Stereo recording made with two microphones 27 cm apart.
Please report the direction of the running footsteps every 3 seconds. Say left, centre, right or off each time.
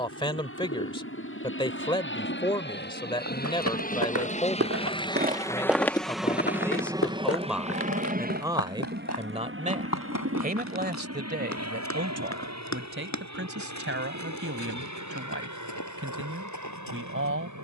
off, right, left, left, left, left.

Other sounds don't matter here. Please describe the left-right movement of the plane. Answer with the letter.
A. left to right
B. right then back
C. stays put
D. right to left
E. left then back
A.